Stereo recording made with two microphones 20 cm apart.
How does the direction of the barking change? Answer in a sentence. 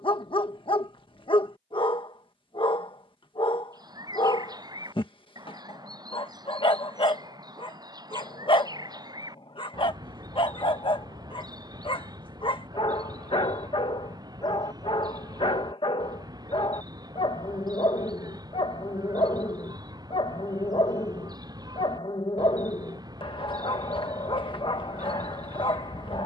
In this clip you hear the barking stay in one place.